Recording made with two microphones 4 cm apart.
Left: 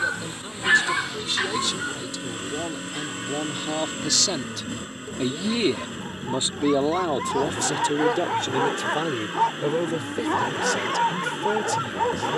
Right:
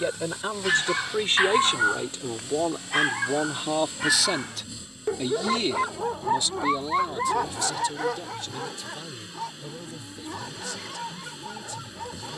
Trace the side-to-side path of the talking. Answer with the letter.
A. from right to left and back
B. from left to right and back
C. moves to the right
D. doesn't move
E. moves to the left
E.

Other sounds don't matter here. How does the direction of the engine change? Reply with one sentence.
In this clip you hear the engine stay put.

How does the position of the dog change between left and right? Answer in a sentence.
In this clip you hear the dog move from left to right and back again.